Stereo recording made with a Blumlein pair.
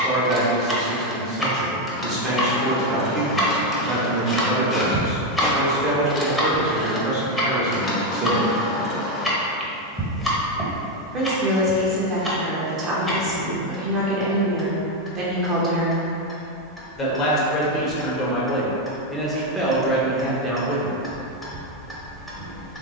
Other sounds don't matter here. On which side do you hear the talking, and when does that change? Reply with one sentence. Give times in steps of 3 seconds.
You can hear the talking on the right from 0 s, in the centre from 15 s and not at all from 21 s.